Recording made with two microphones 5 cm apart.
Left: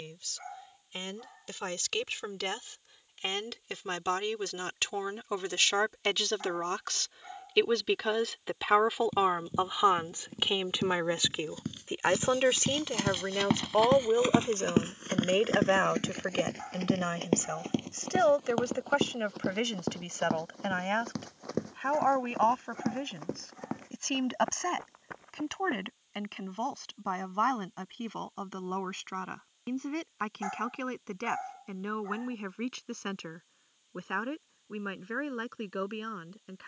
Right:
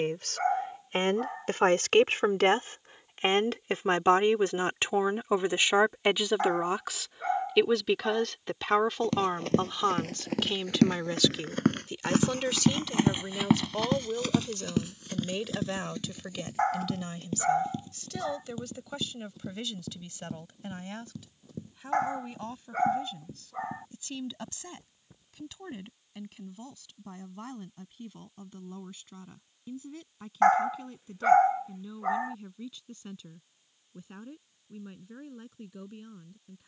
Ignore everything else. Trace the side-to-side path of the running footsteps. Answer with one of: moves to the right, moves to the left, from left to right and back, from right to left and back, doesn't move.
moves to the left.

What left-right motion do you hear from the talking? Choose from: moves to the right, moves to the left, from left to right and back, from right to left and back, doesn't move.
moves to the left.